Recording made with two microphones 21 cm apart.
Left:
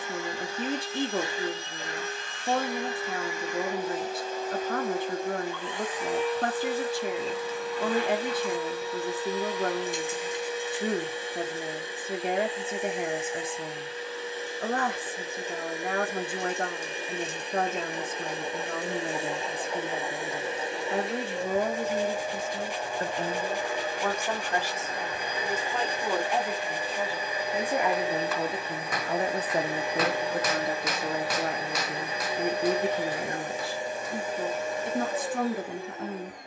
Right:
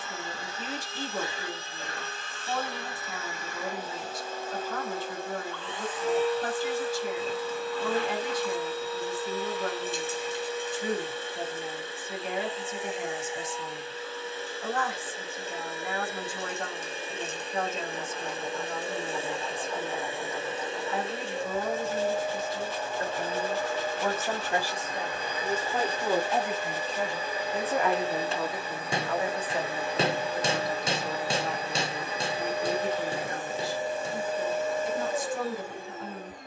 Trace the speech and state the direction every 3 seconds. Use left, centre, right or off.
left, left, left, left, left, left, left, left, centre, left, left, left.